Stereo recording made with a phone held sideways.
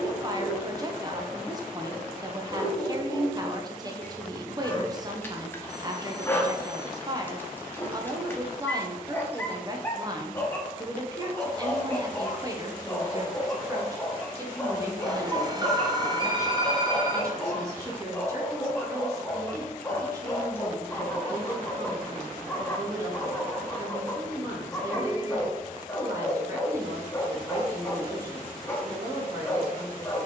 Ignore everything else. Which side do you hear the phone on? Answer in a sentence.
You can hear the phone on the right.